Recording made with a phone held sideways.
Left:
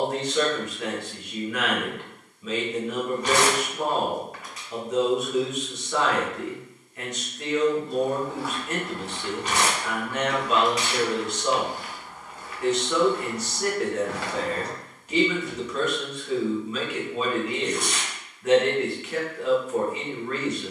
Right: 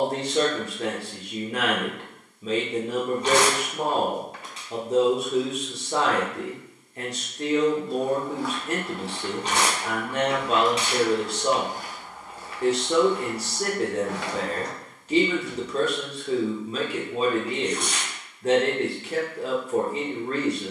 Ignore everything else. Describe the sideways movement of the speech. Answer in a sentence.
In this clip you hear the speech stay in one place.